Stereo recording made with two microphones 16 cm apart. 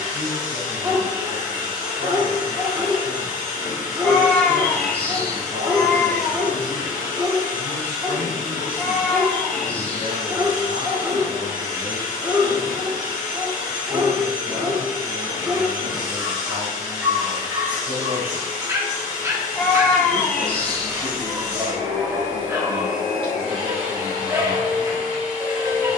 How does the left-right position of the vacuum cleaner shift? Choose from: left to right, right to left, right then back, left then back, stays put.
stays put.